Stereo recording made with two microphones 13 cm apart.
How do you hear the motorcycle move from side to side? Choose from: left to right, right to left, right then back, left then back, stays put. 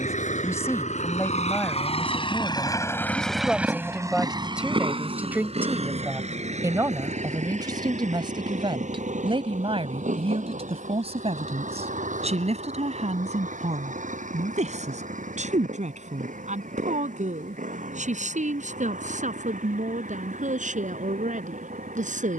left to right.